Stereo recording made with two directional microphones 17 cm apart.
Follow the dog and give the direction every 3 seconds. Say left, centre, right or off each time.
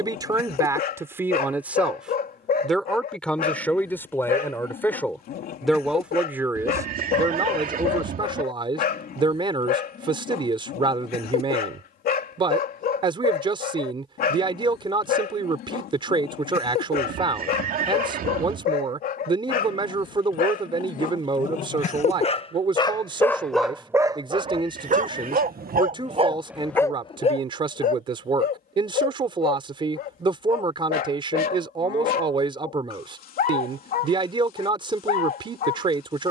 left, left, left, left, left, left, left, left, right, left, left, left.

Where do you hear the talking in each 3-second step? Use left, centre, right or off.
centre, centre, right, right, right, right, right, right, right, right, right, right.